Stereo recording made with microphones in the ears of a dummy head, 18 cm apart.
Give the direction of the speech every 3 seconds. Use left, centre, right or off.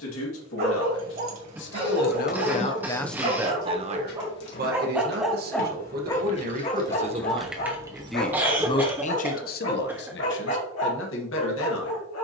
left, right, right, left.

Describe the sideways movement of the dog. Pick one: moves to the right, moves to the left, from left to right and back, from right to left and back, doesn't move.
moves to the left.